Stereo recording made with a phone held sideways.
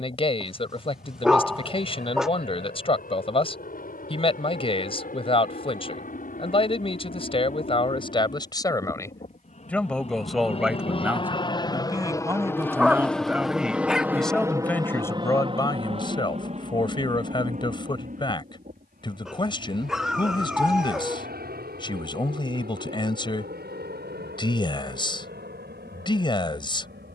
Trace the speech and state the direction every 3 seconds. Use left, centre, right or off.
left, left, left, centre, centre, left, left, left, left.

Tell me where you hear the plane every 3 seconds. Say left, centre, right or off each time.
left, left, left, left, centre, right, right, right, right.